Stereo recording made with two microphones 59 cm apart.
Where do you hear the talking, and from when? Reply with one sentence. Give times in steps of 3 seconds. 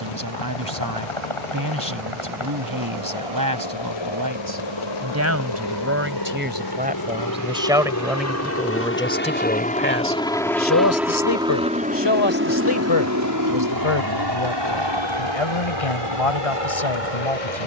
In this clip you hear the talking on the right from 0 s, in the centre from 6 s and on the left from 9 s.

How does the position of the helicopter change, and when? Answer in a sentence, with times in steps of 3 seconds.
In this clip you hear the helicopter on the left from 0 s, in the centre from 9 s and on the right from 12 s.